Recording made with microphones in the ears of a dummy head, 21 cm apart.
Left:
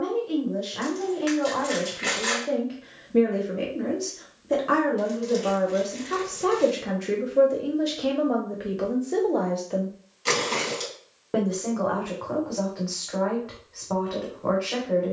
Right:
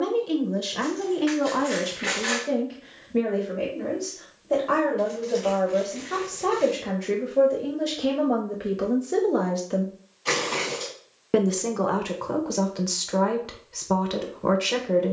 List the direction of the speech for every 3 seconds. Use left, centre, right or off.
right, left, centre, right, right.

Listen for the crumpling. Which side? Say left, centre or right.
left.